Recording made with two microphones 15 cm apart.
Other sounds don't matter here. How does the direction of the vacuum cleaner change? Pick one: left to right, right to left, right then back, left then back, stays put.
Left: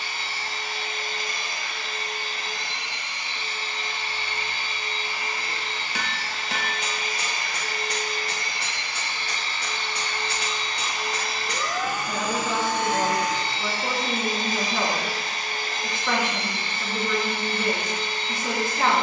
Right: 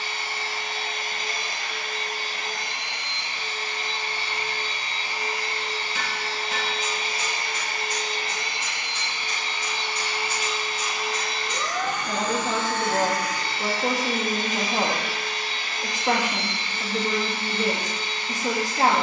right to left.